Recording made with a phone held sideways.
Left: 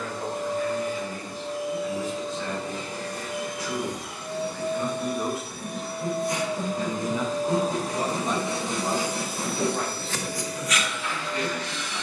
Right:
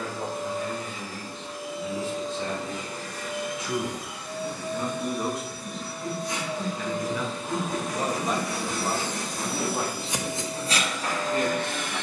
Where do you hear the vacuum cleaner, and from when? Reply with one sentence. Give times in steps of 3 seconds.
In this clip you hear the vacuum cleaner on the left from 0 s and on the right from 9 s.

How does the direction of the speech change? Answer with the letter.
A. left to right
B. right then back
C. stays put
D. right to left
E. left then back
E.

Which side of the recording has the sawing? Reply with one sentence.
In this clip you hear the sawing on the left.